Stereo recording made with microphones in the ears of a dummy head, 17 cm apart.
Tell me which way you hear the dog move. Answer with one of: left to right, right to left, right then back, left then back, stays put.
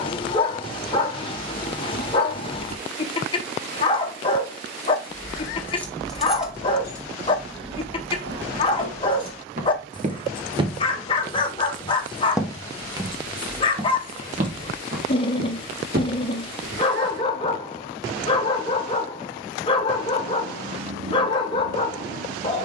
stays put.